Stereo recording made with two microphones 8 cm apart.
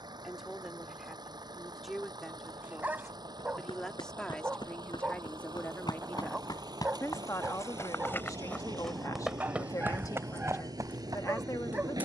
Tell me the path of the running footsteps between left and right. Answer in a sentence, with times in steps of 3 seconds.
In this clip you hear the running footsteps not at all from 0 s, on the left from 3 s and on the right from 9 s.